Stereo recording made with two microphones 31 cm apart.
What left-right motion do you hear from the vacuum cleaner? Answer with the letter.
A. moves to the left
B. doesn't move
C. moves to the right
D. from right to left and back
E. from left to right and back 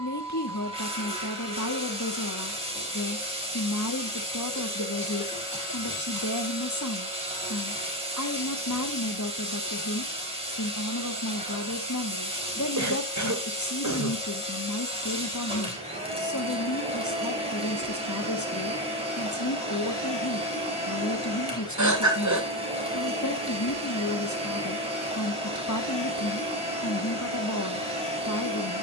B.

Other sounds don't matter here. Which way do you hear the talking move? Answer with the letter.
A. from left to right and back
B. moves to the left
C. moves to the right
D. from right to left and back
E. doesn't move
E.